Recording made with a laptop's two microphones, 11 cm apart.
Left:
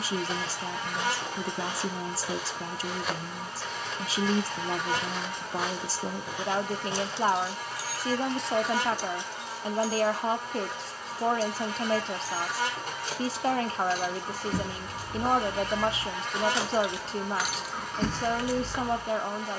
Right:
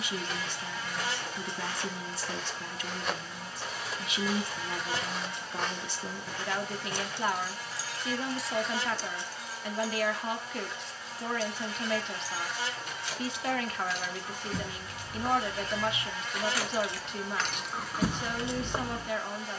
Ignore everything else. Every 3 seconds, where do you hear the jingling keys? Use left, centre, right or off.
off, off, right, left, left, left, right.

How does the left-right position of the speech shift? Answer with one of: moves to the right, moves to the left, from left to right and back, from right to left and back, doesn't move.
doesn't move.